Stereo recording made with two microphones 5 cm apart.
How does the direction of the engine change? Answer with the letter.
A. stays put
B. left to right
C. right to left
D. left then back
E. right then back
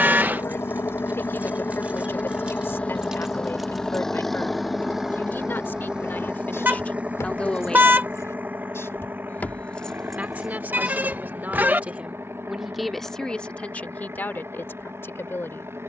B.